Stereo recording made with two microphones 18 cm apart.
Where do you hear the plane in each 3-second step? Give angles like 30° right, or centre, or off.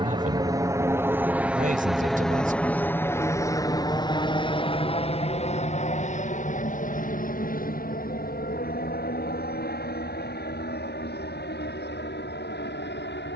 10° right, 30° left, 50° left, 60° left, 60° left.